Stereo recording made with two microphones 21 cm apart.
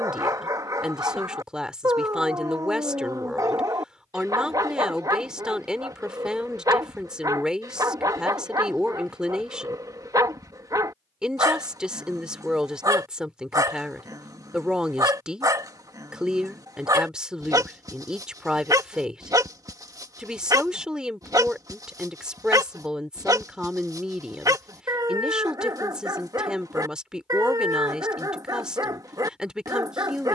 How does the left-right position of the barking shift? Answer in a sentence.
In this clip you hear the barking stay put.